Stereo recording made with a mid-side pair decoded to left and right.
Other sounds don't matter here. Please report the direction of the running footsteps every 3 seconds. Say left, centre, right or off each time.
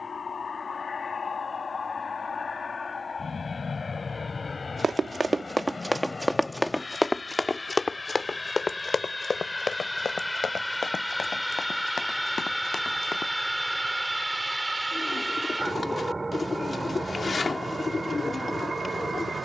off, right, left, left, left, off, off.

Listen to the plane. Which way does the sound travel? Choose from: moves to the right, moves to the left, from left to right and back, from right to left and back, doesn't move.
moves to the right.